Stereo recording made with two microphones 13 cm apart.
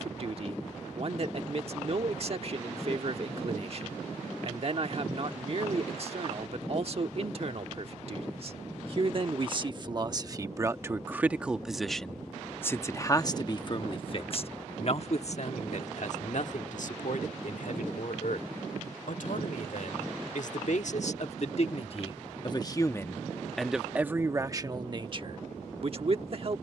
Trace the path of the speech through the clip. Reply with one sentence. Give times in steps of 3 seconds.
In this clip you hear the speech on the right from 0 s, on the left from 12 s and on the right from 24 s.